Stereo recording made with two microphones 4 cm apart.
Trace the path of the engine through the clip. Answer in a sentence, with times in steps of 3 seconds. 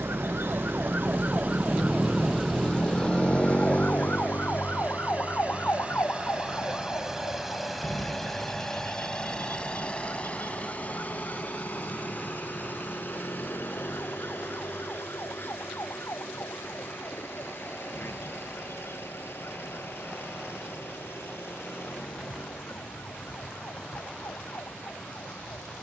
In this clip you hear the engine on the right from 0 s, in the centre from 6 s and on the left from 9 s.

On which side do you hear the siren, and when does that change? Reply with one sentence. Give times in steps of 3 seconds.
In this clip you hear the siren on the right from 0 s and on the left from 3 s.